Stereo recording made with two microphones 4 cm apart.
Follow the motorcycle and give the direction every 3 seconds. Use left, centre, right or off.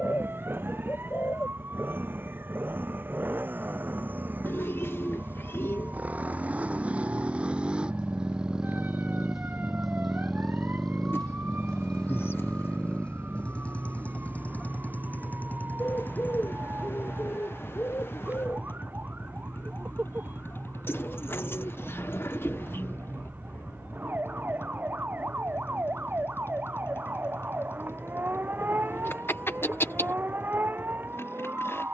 right, right, right, centre, left, left, left, left, left, left, left.